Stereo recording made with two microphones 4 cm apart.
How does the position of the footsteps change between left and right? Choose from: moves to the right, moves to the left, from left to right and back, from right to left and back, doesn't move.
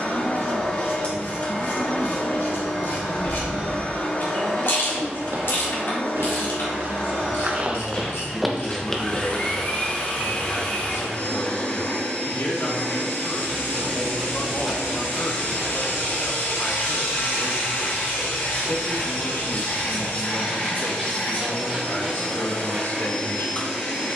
moves to the left.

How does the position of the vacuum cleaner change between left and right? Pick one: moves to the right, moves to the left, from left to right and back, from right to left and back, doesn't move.
doesn't move.